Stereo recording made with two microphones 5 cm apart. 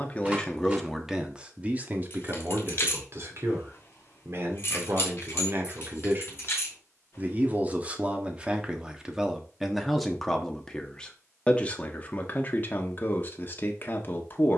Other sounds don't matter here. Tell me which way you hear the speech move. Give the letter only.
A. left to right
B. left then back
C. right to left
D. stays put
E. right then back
E.